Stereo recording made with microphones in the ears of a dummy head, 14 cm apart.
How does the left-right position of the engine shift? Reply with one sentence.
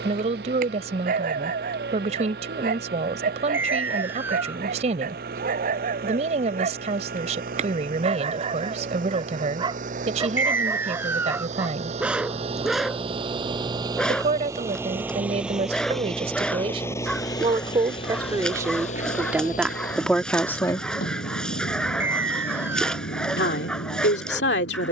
In this clip you hear the engine go from the right side to the left.